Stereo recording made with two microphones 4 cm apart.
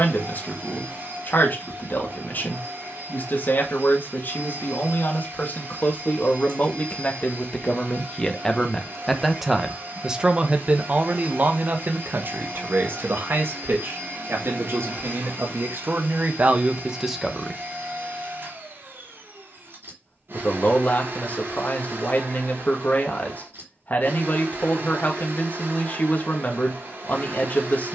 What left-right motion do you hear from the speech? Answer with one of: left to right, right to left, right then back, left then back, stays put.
right then back.